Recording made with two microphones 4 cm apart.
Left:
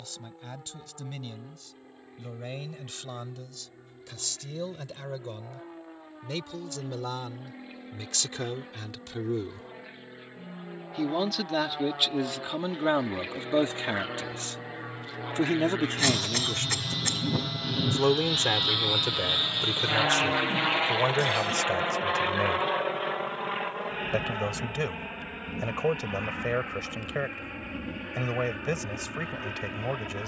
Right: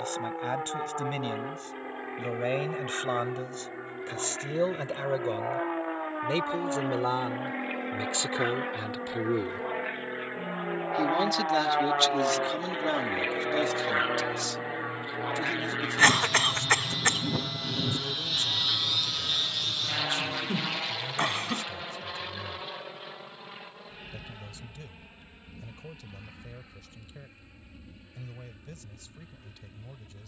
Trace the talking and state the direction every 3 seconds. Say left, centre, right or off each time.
right, right, right, centre, left, left, left, left, left, left.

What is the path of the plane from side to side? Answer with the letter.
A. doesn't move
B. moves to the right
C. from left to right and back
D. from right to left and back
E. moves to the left
E.